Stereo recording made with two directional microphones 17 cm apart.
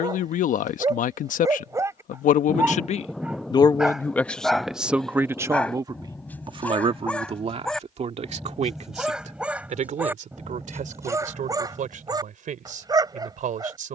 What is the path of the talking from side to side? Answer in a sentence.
In this clip you hear the talking move to the right.